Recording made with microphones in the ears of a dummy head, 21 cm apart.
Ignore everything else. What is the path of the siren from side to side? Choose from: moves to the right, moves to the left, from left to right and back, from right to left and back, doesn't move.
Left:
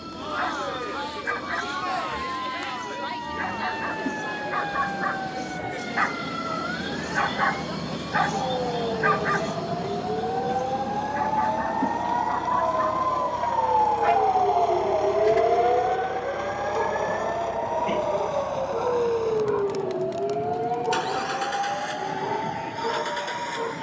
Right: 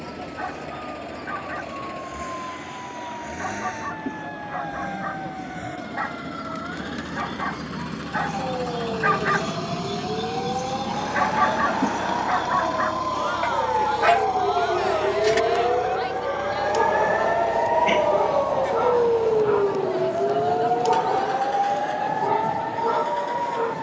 moves to the right.